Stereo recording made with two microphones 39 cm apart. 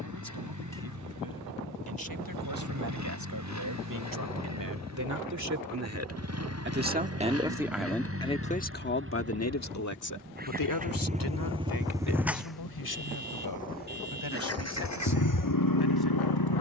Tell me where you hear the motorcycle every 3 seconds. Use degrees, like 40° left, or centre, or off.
50° right, 50° right, 40° right, 20° right, 20° left, 60° left.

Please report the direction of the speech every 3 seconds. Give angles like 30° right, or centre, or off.
70° right, 50° right, centre, 50° left, 80° left, 80° left.